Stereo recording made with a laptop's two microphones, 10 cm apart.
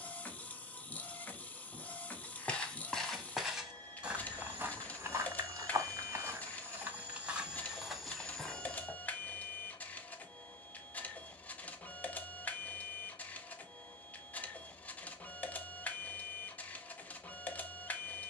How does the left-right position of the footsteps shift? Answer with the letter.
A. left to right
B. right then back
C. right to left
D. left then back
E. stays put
B.